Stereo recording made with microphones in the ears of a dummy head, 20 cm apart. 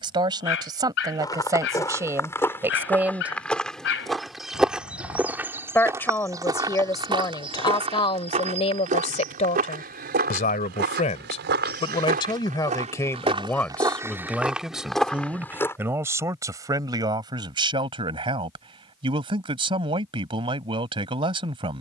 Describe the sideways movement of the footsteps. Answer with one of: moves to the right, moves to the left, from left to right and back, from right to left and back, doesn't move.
from left to right and back.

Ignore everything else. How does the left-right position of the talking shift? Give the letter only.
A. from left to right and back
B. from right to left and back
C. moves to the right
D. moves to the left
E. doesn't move
B.